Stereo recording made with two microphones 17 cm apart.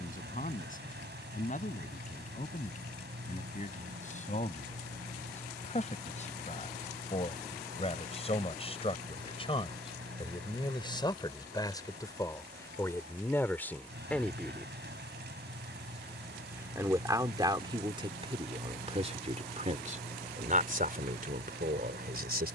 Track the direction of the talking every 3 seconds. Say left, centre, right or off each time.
left, left, left, left, centre, right, right, right.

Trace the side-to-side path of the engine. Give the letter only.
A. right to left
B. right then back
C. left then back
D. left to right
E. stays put
E.